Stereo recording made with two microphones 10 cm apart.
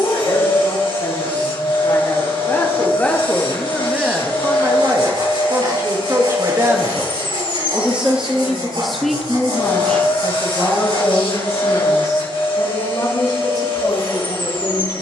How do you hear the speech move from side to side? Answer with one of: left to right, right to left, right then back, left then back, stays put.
right then back.